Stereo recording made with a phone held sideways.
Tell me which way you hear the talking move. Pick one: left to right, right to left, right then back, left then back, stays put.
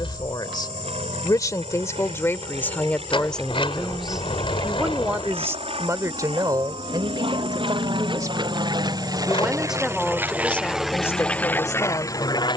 right then back.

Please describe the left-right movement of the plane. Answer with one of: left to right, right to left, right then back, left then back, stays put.
right to left.